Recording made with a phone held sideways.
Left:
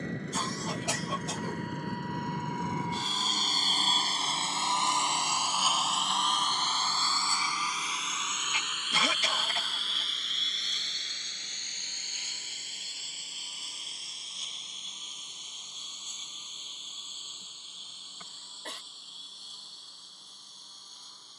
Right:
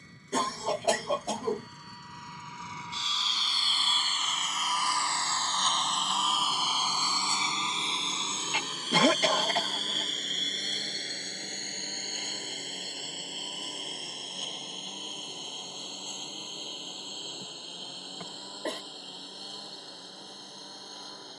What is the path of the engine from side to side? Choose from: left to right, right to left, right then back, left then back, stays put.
left to right.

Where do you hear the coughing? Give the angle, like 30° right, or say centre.
60° right.